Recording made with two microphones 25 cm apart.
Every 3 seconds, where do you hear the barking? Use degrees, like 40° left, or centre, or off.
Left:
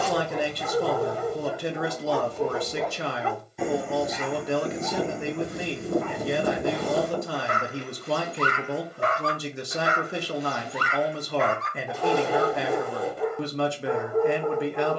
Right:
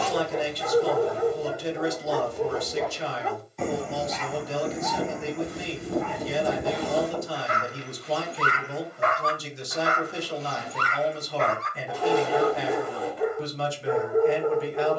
20° right, 30° left, 50° left, 10° left, 10° right.